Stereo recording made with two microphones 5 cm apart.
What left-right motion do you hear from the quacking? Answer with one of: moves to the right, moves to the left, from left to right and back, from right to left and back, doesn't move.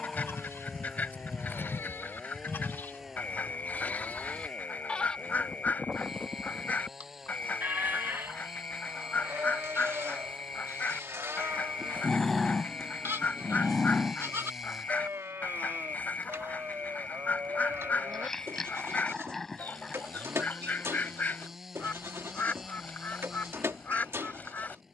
doesn't move.